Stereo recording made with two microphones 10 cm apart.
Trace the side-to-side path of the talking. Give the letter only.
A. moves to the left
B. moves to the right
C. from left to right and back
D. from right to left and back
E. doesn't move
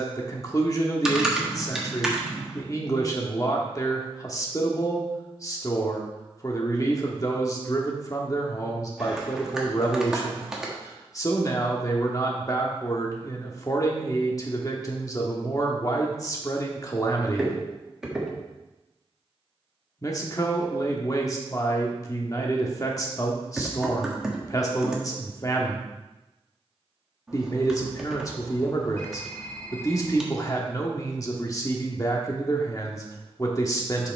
E.